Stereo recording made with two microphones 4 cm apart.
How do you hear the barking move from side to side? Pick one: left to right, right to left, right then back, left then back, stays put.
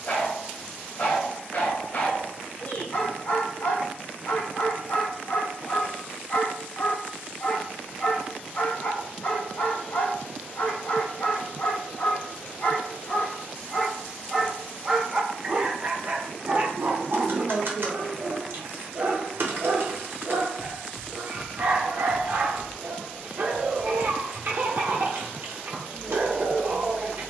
left to right.